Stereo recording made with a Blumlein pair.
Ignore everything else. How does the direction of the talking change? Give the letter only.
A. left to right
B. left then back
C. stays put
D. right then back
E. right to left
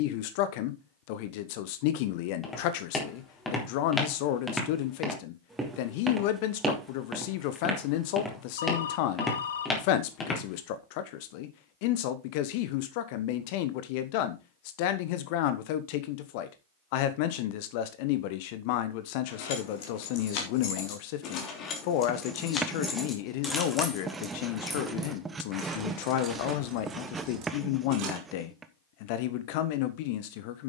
C.